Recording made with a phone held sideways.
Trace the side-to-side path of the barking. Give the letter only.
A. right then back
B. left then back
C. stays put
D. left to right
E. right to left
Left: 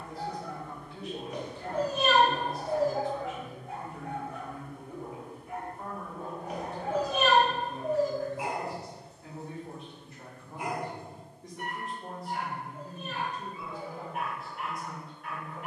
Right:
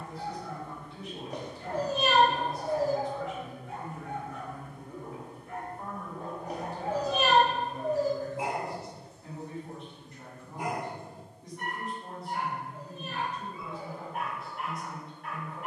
D.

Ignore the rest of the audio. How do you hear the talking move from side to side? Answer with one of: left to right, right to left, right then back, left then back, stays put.
stays put.